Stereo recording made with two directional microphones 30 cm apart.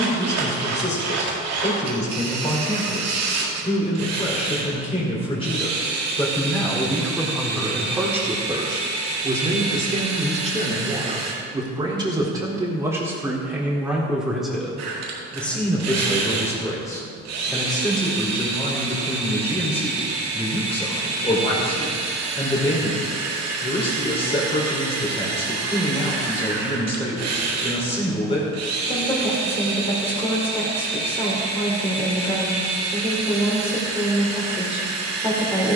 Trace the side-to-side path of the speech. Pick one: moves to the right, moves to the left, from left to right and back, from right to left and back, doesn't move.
from left to right and back.